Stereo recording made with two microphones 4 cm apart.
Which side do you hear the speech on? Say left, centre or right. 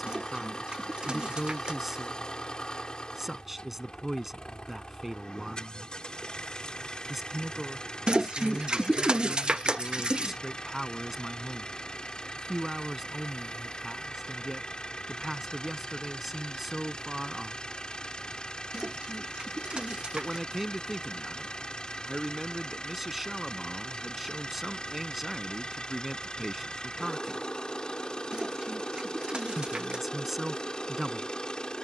centre.